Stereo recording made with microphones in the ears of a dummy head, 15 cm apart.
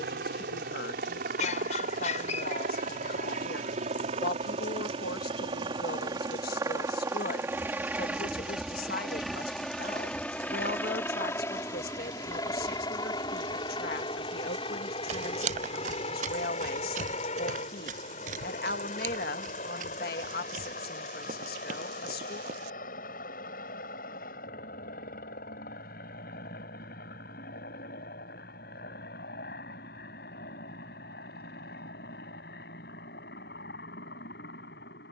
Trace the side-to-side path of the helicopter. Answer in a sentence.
You can hear the helicopter move from right to left.